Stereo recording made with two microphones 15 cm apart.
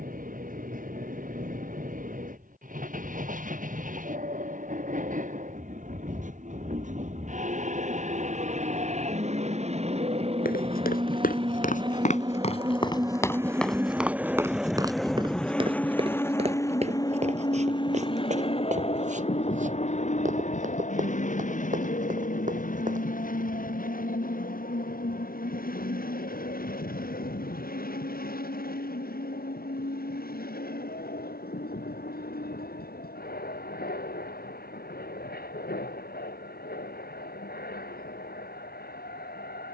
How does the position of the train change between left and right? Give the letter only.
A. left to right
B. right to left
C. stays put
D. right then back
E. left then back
B.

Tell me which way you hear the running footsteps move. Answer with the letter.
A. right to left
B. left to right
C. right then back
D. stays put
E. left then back
B.